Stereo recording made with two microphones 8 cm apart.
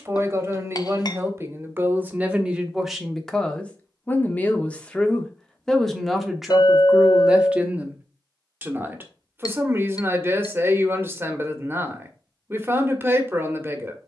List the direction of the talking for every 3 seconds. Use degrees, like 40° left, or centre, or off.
20° right, 10° left, 10° right, 30° right, 30° right.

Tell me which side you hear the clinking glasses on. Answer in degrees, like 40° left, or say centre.
50° left.